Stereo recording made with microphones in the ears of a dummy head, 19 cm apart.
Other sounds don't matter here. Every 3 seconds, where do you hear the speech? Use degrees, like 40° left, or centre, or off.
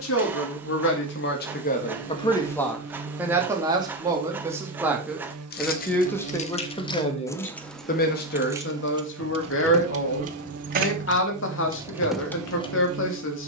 50° left, 10° right, 30° left, 60° left, 60° left.